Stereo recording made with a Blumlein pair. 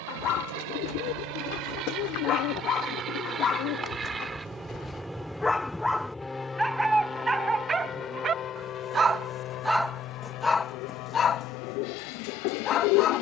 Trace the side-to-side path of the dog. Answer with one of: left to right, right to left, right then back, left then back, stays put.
right then back.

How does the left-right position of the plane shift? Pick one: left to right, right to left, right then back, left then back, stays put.
right to left.